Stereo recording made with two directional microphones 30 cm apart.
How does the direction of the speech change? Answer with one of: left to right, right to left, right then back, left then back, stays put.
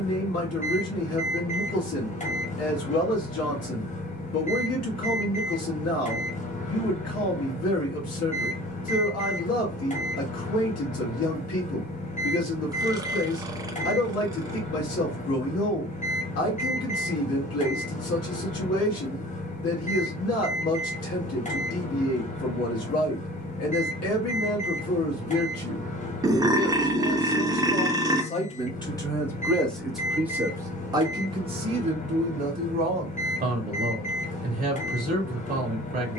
left to right.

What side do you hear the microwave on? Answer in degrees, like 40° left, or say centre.
20° left.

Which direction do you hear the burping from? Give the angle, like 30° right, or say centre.
10° right.